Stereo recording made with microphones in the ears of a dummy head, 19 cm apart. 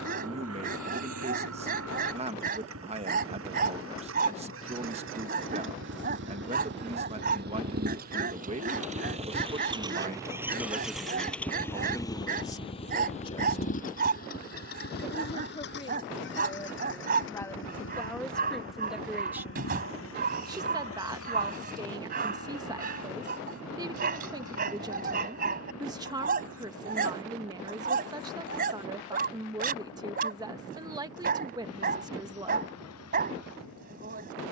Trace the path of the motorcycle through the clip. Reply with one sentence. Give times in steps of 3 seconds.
You can hear the motorcycle on the right from 0 s, in the centre from 9 s and on the left from 12 s.